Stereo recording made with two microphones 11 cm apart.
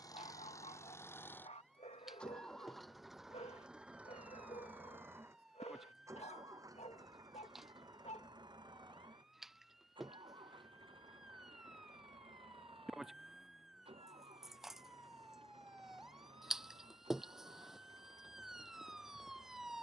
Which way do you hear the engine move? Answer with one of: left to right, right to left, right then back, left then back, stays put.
left to right.